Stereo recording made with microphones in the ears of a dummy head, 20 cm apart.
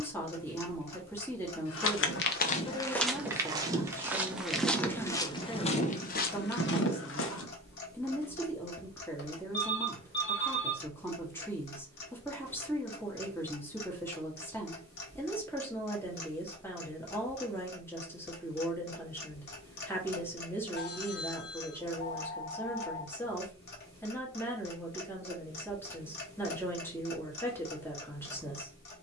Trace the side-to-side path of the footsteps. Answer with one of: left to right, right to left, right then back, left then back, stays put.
right then back.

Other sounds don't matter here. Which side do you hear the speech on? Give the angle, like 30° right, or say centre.
10° left.